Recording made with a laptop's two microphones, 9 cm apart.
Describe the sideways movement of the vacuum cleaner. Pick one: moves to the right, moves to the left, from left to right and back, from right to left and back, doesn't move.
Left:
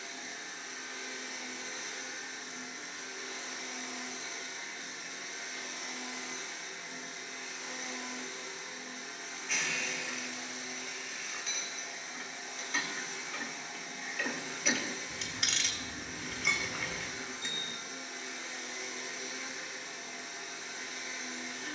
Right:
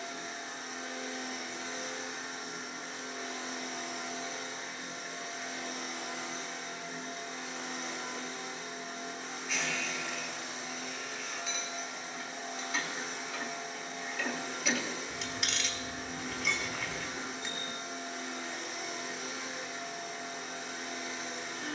doesn't move.